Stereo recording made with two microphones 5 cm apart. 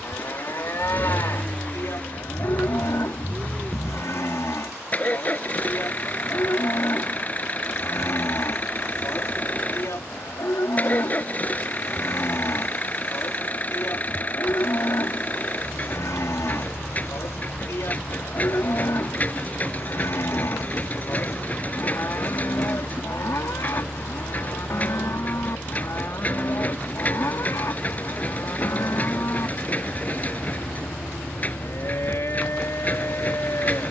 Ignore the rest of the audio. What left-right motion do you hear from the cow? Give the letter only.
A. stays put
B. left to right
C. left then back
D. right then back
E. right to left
A.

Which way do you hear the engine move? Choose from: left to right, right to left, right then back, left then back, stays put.
stays put.